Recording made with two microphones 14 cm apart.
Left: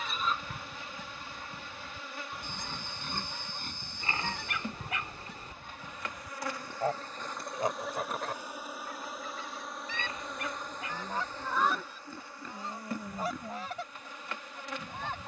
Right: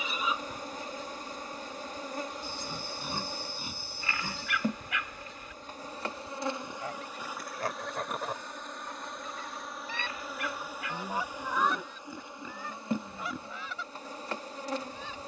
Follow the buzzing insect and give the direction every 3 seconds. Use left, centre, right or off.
right, right, centre, centre, right.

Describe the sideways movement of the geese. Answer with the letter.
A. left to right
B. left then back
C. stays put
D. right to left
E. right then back
E.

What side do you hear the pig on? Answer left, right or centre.
centre.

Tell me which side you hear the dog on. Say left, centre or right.
left.